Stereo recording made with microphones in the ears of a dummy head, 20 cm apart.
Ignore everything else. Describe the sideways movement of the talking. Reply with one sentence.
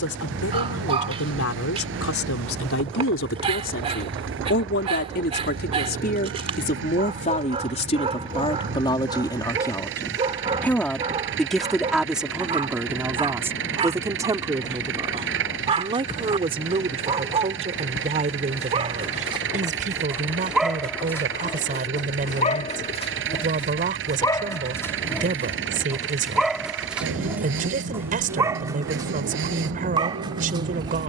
You can hear the talking move to the right.